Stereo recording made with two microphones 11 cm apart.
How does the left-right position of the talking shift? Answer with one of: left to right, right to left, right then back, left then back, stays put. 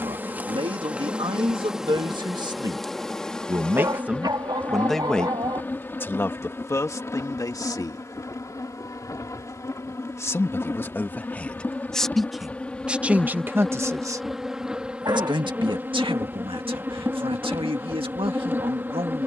left then back.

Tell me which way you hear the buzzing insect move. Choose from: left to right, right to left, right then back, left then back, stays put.
left then back.